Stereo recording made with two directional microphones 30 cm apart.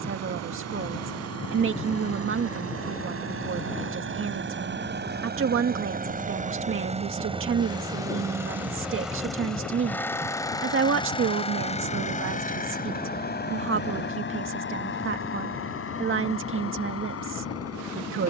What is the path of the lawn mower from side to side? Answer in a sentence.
In this clip you hear the lawn mower move to the left.